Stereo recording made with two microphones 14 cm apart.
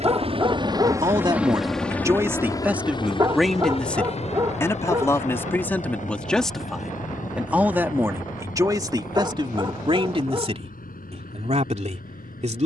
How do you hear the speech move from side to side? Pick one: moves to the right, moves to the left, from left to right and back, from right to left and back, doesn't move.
from right to left and back.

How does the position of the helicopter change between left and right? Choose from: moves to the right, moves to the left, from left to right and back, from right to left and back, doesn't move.
moves to the left.